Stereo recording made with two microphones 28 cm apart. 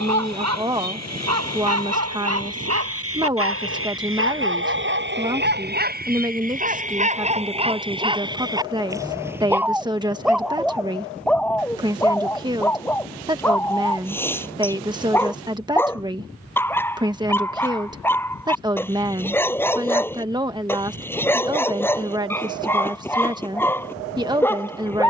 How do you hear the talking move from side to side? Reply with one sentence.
In this clip you hear the talking stay in one place.